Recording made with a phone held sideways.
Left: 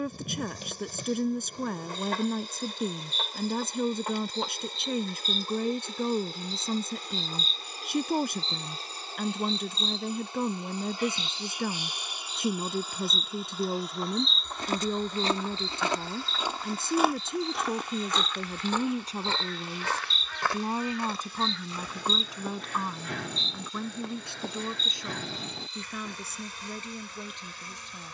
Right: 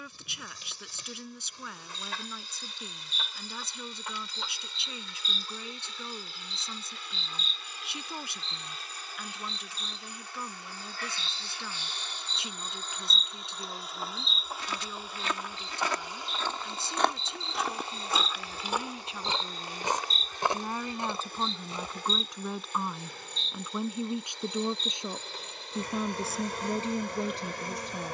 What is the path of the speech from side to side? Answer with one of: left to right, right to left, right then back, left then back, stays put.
left to right.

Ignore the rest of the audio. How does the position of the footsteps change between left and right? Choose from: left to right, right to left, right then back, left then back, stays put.
left to right.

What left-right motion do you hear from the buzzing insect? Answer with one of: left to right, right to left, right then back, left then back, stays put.
left to right.